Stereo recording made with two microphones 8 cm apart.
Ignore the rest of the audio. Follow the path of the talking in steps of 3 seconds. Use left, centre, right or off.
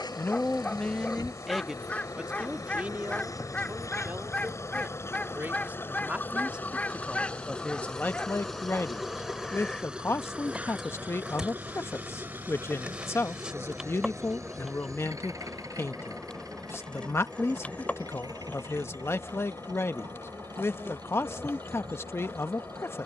centre, right, centre, left, left, left, left, left.